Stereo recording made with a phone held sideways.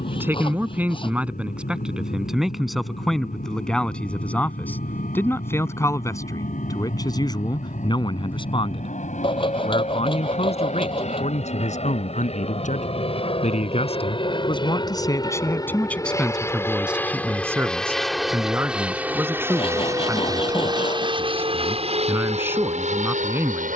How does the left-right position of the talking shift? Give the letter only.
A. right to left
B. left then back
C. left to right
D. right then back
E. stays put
B.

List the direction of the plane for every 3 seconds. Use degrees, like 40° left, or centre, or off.
60° left, 60° left, 50° left, 50° left, 40° left, 20° left, 10° right, 40° right.